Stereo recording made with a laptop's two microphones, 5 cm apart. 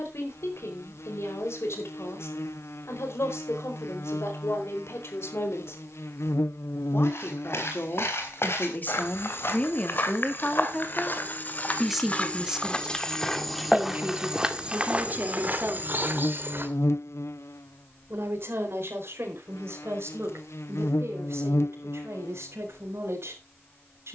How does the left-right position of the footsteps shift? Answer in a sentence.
In this clip you hear the footsteps move from left to right.